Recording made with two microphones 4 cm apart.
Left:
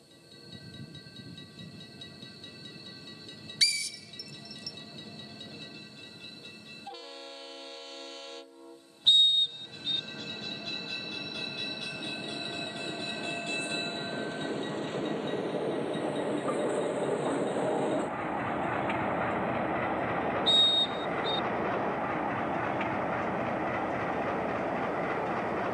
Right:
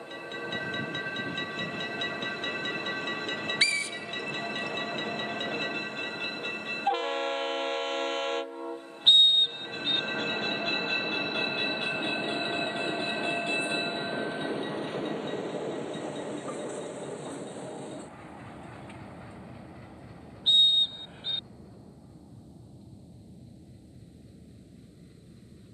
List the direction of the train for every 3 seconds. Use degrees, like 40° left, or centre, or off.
60° right, 60° right, 50° right, 40° right, 20° right, 20° left, 50° left, 70° left, 80° left.